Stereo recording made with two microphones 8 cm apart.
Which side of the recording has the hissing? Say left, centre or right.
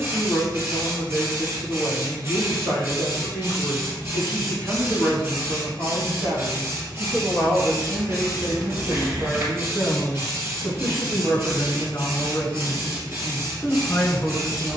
right.